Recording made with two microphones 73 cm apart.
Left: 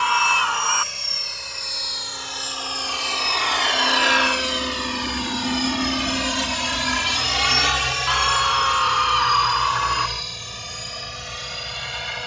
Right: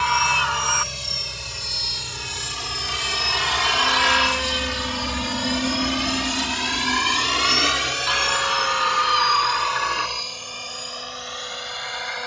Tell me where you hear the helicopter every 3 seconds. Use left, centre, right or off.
right, right, left, left.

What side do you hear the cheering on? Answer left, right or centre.
right.